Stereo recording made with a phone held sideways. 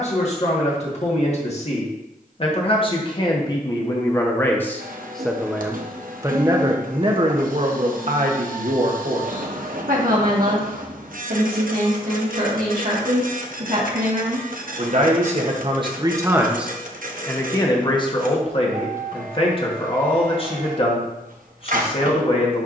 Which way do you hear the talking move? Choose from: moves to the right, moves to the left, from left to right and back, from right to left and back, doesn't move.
from left to right and back.